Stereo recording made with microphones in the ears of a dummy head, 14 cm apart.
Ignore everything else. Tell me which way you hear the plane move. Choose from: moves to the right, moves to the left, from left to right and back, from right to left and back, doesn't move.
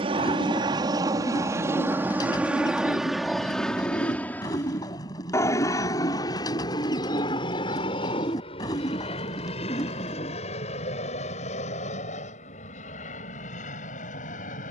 moves to the left.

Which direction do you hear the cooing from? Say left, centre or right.
left.